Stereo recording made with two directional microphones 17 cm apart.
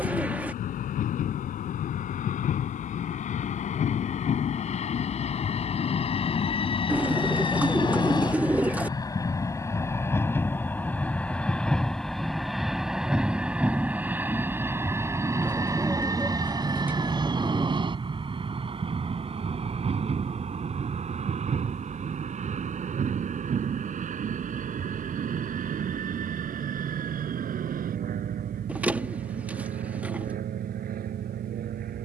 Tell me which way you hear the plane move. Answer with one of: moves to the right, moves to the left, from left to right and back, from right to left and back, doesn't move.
moves to the right.